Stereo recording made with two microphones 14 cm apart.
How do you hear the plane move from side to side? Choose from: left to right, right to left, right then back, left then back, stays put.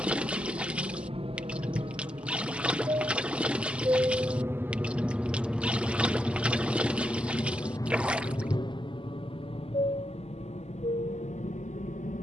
right to left.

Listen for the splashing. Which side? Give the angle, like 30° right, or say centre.
10° right.